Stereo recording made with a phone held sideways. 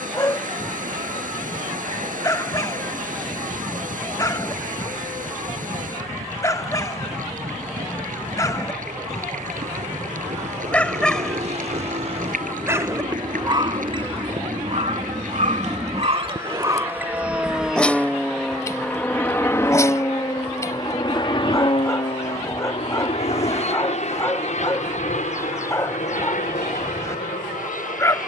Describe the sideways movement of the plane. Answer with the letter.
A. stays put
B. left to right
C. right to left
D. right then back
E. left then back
C.